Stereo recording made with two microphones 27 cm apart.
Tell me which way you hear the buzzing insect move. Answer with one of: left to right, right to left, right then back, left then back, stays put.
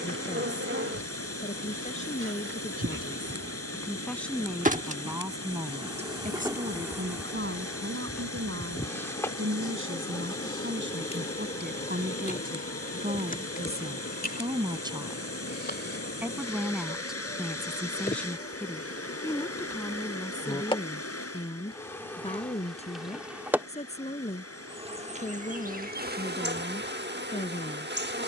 left then back.